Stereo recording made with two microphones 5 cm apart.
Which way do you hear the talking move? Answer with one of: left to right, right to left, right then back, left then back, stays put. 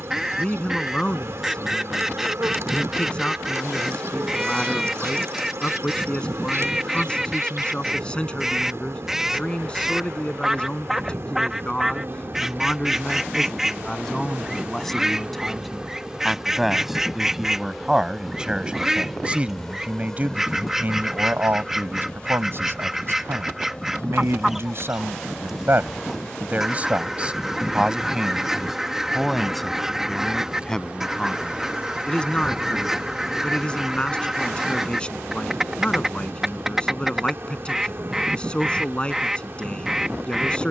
right then back.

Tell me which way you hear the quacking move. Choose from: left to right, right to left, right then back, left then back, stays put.
stays put.